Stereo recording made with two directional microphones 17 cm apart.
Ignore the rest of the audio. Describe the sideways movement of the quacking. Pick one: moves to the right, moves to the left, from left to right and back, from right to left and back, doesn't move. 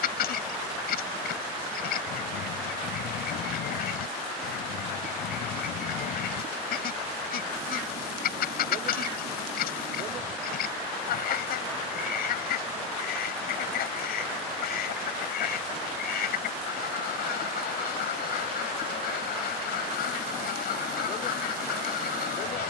doesn't move.